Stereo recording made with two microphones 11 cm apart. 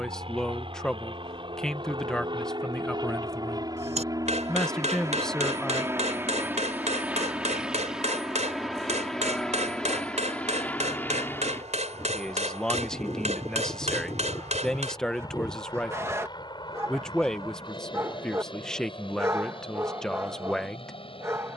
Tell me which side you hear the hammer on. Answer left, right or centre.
right.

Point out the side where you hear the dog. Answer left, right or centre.
right.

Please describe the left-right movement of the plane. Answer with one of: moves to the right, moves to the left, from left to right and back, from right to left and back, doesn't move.
moves to the left.